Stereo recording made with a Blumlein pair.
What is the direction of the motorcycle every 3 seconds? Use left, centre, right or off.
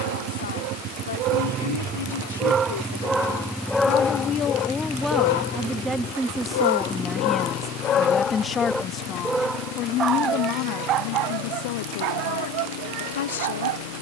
right, centre, left, left, left.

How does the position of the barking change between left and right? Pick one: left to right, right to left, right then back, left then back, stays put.
left then back.